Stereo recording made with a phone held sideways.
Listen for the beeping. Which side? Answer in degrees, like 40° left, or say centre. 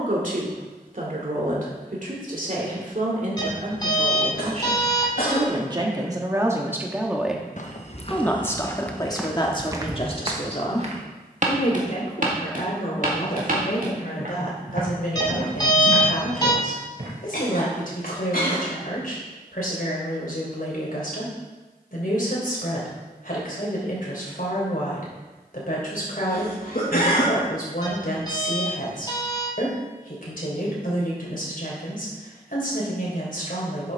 30° left.